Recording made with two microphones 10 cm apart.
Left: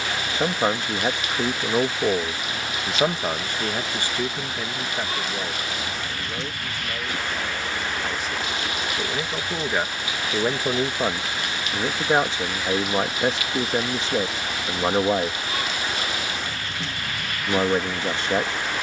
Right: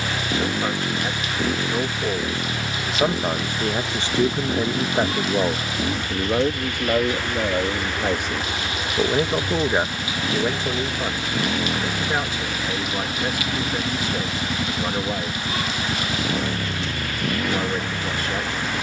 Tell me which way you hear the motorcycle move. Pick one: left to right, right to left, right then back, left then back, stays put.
stays put.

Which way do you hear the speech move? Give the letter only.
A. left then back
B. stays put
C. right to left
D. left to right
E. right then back
E.